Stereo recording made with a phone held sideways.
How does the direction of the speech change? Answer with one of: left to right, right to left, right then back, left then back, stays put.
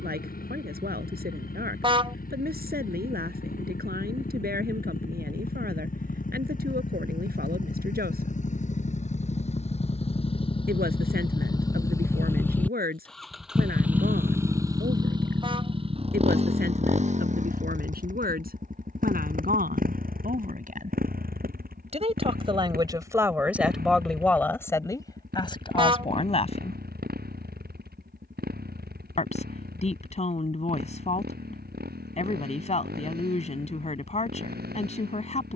right to left.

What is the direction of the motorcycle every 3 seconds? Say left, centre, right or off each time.
left, left, left, left, centre, right, right, right, right, right, right, right.